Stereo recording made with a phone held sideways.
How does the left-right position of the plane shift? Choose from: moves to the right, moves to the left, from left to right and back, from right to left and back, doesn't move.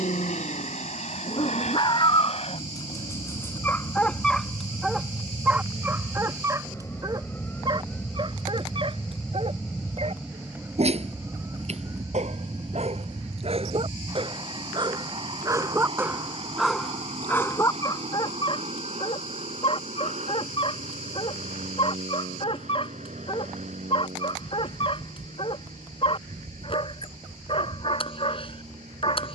moves to the right.